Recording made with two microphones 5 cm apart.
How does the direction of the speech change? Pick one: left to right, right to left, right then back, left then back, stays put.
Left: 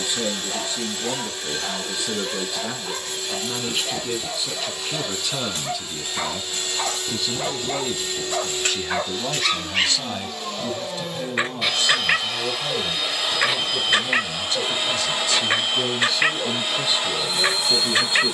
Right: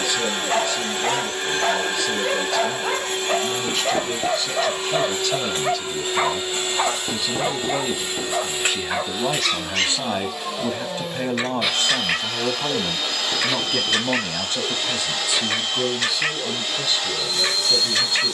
right then back.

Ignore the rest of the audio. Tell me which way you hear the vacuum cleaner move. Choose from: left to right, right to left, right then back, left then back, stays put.
right to left.